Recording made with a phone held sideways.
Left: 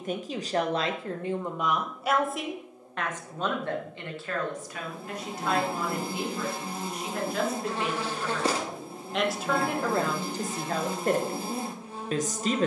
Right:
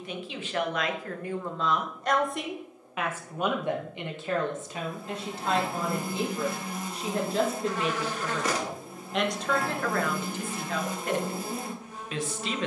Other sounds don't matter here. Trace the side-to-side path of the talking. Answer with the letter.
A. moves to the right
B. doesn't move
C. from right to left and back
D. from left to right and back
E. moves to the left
D.